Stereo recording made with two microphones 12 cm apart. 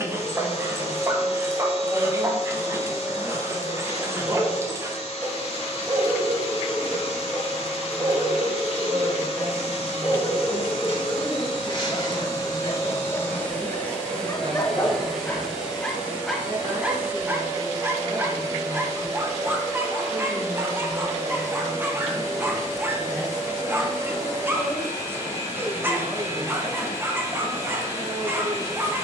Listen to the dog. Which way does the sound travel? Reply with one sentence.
In this clip you hear the dog move from right to left and back again.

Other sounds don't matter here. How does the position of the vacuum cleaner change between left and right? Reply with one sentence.
You can hear the vacuum cleaner move from left to right.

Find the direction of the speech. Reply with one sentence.
You can hear the speech on the right.